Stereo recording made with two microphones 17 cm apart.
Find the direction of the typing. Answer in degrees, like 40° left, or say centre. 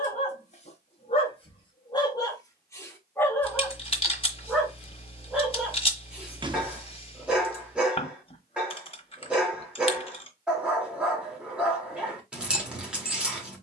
30° left.